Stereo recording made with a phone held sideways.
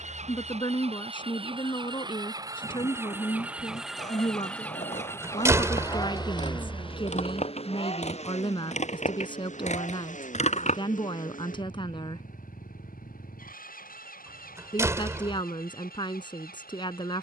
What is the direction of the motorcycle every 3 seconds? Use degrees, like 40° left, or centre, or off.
30° right, 10° left, 40° left, 50° left, 60° left, 70° left.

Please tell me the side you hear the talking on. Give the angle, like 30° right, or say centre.
30° left.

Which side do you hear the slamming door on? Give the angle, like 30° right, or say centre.
20° right.